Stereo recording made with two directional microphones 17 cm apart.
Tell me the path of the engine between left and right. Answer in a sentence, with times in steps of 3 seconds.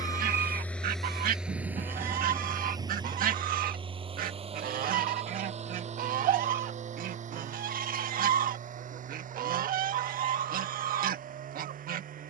You can hear the engine in the centre from 0 s and on the right from 3 s.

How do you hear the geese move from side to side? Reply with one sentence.
In this clip you hear the geese stay put.